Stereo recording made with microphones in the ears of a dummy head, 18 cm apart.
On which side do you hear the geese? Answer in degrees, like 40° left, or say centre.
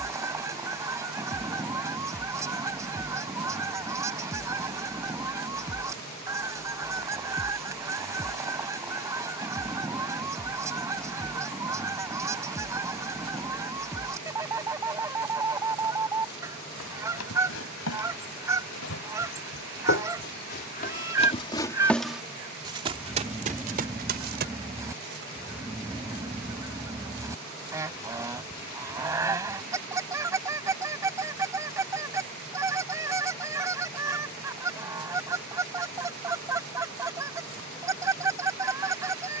10° right.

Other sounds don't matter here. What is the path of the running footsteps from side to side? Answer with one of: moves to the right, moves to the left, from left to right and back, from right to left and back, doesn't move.
moves to the right.